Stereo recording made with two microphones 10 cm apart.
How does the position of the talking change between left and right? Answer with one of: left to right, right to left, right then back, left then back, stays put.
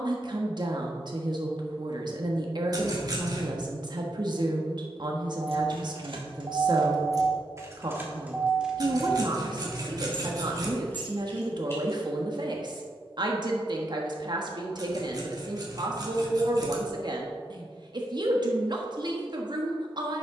stays put.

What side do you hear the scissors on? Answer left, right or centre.
right.